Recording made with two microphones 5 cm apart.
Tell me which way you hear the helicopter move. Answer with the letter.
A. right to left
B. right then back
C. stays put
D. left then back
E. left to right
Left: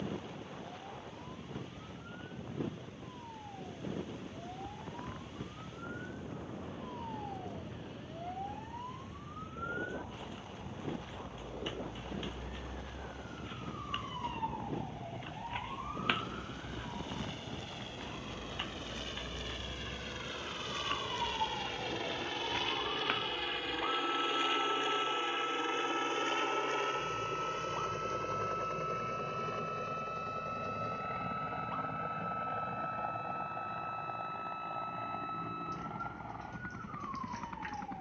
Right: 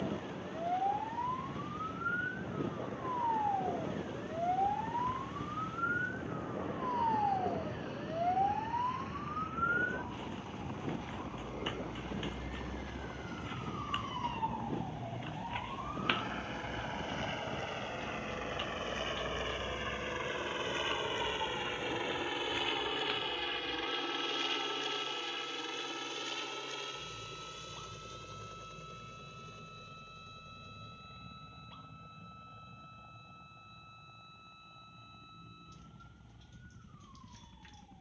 A.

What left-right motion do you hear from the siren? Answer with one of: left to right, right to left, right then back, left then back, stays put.
right to left.